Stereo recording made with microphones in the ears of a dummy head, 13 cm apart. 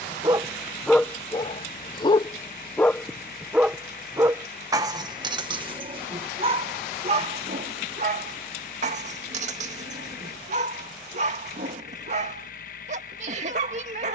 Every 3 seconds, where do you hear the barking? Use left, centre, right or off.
centre, right, right, right, right.